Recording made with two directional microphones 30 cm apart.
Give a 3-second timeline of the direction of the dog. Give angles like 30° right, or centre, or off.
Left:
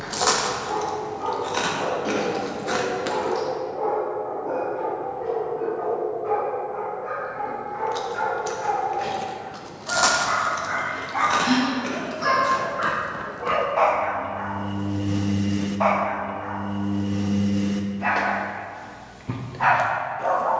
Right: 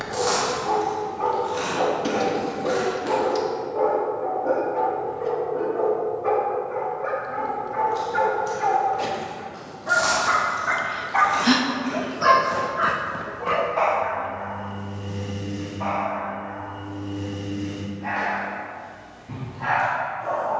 50° right, 50° right, 50° right, 40° right, centre, 60° left, 70° left.